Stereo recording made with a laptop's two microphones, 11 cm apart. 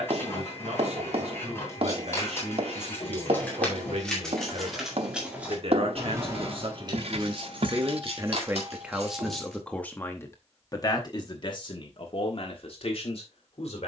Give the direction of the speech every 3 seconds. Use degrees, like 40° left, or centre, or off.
80° right, 70° right, 40° right, 20° left, 60° left.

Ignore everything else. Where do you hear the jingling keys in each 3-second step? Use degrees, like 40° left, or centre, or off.
20° left, centre, 50° right, 70° right, off.